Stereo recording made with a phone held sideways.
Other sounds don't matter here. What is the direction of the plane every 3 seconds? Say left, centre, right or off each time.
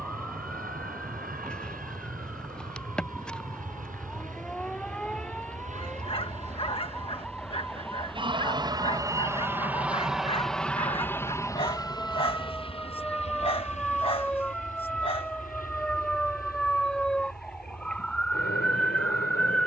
right, right, right, centre, left, left, left.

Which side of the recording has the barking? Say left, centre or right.
left.